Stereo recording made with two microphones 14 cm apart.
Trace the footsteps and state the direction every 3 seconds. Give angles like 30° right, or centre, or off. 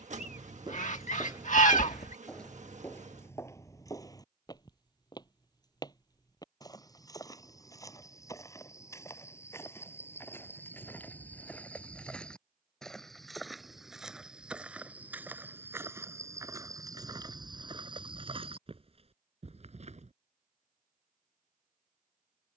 10° right, 20° left, 20° left, 10° left, centre, 20° right, 40° right, off.